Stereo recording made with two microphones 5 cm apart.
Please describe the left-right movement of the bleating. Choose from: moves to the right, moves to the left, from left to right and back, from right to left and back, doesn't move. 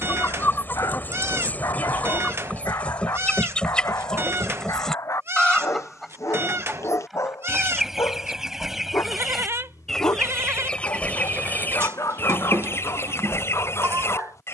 doesn't move.